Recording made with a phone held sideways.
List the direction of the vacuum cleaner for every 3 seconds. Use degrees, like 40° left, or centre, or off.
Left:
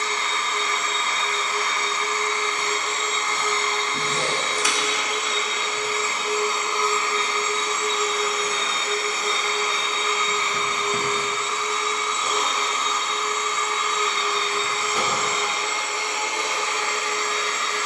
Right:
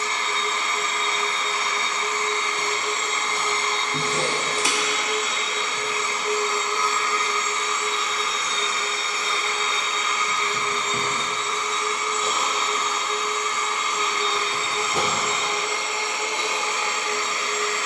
20° right, 10° right, 30° left, 20° left, 10° right, 20° right.